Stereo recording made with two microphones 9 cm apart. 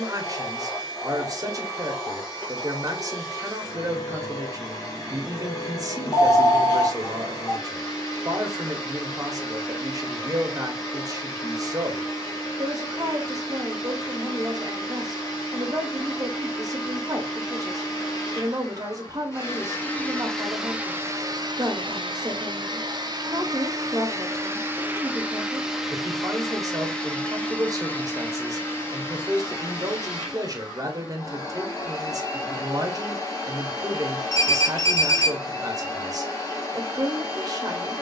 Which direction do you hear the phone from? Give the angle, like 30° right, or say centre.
40° left.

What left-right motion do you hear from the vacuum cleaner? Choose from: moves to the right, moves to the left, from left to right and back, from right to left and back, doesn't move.
from left to right and back.